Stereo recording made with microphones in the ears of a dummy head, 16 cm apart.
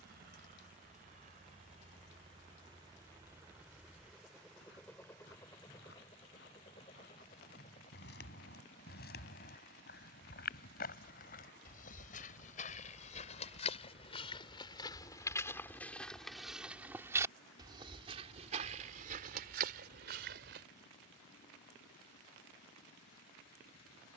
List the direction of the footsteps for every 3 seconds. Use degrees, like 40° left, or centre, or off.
off, 60° left, 60° left, 50° left, 40° left, centre, 50° right, off.